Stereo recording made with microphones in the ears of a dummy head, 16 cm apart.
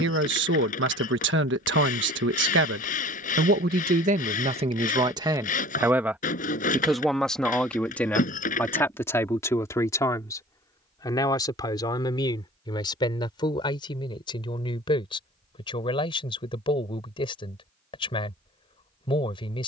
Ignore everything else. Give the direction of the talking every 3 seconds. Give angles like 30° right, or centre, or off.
60° right, 30° right, centre, 20° left, 20° left, 30° left, 30° left.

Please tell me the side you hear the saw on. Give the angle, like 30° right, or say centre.
40° left.